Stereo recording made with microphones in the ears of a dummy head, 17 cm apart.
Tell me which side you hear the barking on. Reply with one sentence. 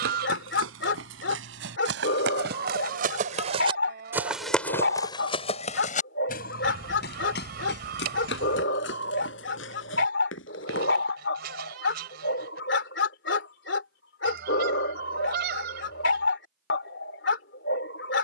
In this clip you hear the barking on the left.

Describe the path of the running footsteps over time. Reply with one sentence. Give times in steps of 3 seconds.
In this clip you hear the running footsteps on the right from 0 s, in the centre from 3 s, on the left from 6 s and not at all from 12 s.